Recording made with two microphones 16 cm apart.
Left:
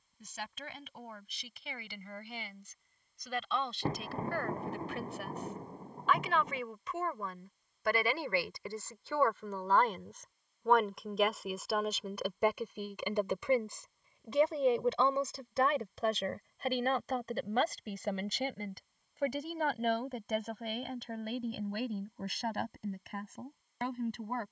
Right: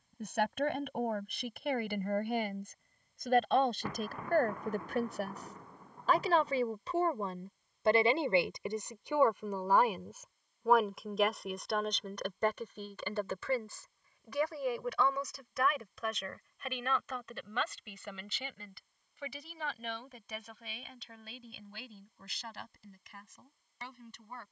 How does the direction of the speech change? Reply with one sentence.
In this clip you hear the speech move to the left.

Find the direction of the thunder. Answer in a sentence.
You can hear the thunder on the left.